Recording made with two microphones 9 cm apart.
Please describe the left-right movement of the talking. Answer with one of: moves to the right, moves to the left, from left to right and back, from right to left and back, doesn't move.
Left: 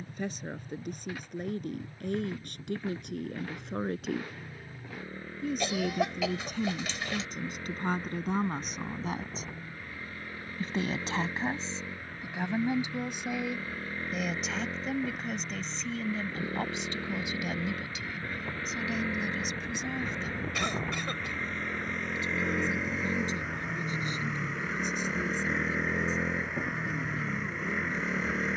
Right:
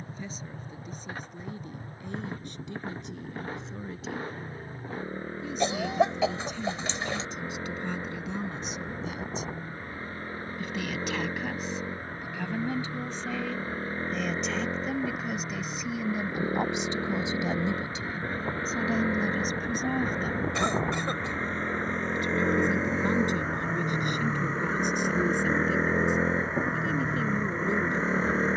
moves to the right.